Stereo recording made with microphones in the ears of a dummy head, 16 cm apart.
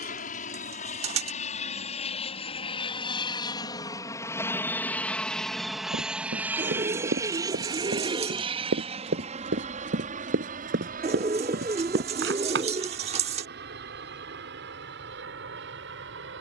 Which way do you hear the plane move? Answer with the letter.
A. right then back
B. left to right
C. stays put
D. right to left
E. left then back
B.